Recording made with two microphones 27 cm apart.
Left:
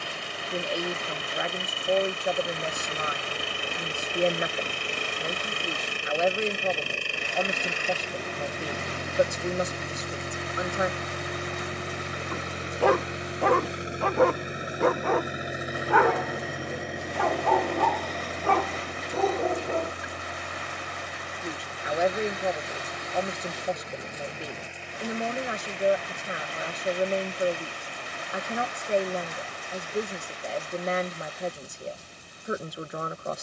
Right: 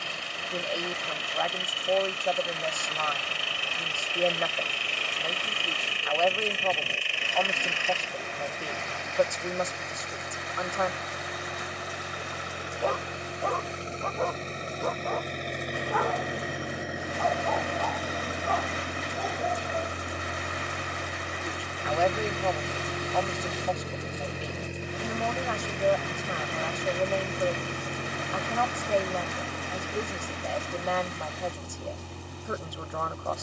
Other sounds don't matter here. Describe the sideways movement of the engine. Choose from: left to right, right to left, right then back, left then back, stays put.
left to right.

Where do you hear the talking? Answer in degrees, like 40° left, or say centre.
20° left.